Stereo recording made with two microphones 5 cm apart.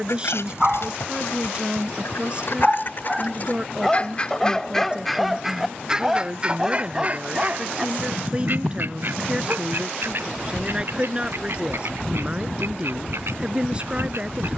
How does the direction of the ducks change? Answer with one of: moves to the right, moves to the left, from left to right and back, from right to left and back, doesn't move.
moves to the right.